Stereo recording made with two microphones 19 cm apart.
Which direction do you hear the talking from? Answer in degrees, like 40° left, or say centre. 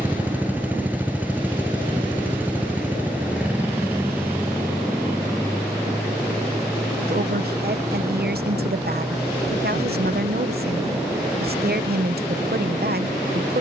60° right.